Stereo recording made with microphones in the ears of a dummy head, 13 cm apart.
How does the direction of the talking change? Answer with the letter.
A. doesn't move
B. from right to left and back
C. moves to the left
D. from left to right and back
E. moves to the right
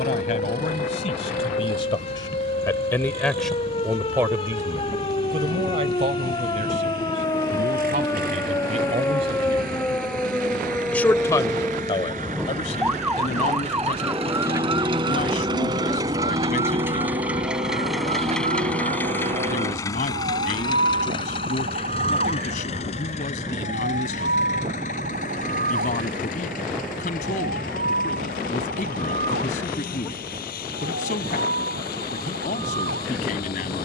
D.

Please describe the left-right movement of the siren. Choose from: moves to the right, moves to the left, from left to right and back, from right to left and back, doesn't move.
moves to the right.